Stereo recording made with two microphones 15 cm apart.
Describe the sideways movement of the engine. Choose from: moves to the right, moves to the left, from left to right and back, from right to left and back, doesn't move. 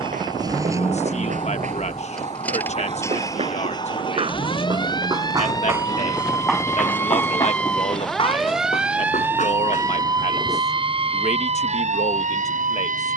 moves to the left.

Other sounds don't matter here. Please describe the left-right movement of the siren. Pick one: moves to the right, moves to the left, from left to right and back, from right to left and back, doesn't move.
moves to the right.